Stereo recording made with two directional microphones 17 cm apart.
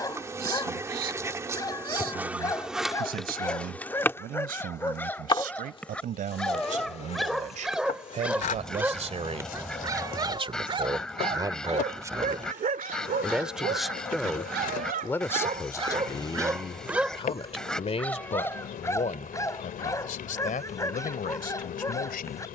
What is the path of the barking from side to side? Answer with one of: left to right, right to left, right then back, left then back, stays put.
right then back.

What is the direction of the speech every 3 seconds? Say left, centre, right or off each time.
right, right, right, right, centre, left, left, left.